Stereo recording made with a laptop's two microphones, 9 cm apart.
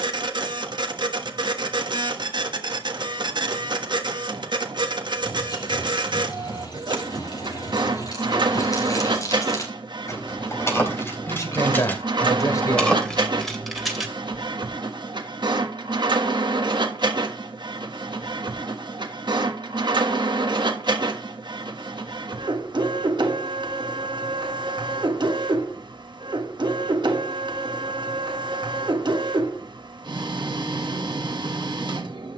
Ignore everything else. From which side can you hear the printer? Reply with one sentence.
You can hear the printer on the right.